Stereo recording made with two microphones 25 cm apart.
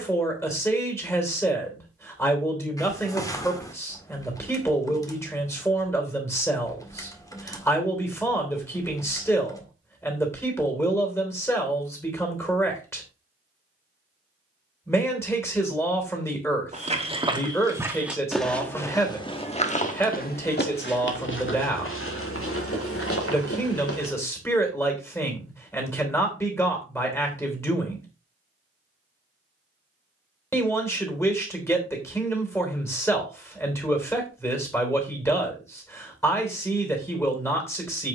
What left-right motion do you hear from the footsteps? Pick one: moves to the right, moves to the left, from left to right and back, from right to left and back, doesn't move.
moves to the left.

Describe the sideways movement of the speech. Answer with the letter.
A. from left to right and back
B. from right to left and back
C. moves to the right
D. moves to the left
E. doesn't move
E.